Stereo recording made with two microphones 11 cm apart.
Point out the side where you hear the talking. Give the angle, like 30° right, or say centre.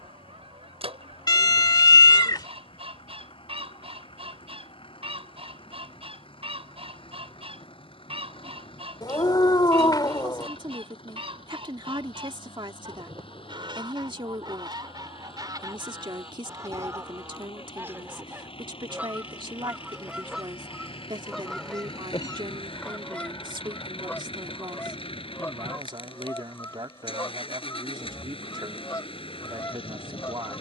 40° right.